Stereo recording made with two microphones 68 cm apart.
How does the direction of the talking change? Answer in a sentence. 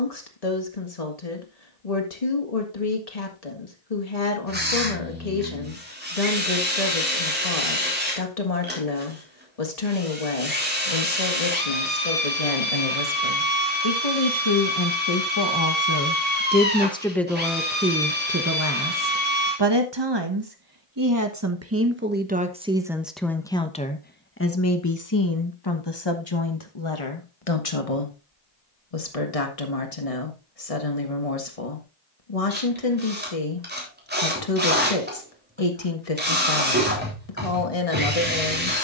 You can hear the talking go right and come back.